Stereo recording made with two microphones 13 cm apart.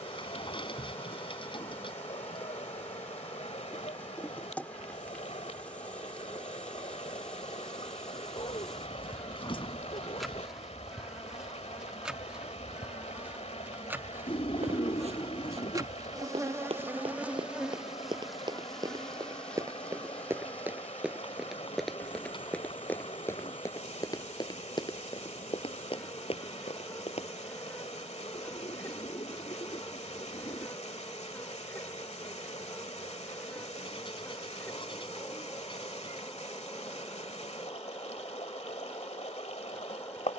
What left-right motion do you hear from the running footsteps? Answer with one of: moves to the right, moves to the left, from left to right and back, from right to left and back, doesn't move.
moves to the left.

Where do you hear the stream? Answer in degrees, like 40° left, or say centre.
60° left.